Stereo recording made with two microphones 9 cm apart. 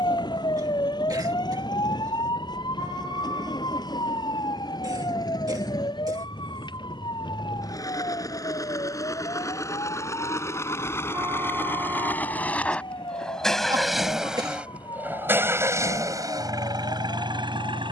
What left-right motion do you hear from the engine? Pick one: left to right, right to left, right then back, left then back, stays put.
left to right.